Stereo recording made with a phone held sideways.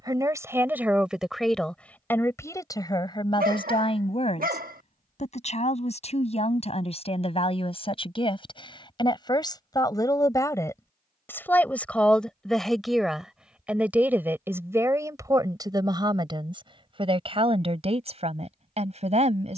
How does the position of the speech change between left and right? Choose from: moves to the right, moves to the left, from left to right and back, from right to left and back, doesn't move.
from right to left and back.